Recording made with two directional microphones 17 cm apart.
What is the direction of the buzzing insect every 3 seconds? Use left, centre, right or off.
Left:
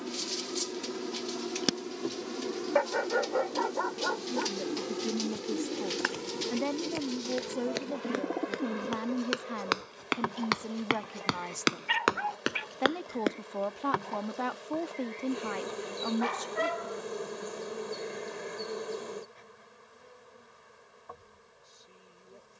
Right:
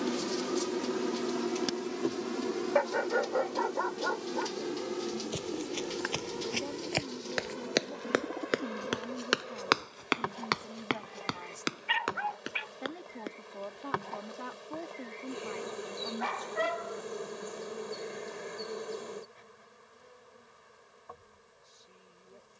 right, centre, centre, centre, centre, centre, centre, centre.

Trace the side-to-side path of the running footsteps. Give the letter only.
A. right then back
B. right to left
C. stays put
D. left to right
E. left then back
B.